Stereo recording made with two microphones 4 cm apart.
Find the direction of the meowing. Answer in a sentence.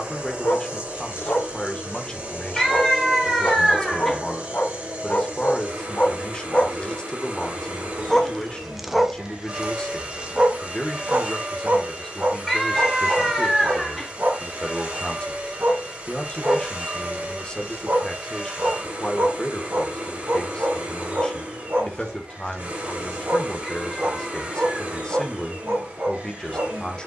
In this clip you hear the meowing in the centre.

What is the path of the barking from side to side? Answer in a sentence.
In this clip you hear the barking move from left to right.